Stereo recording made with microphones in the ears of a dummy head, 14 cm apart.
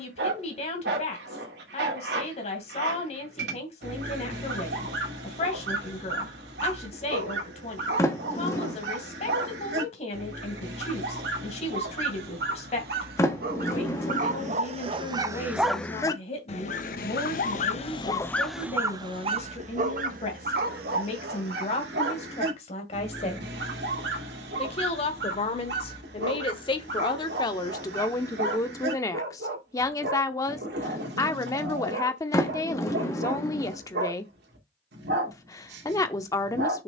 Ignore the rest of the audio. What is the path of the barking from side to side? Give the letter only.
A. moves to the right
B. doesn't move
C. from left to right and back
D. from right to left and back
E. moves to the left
D.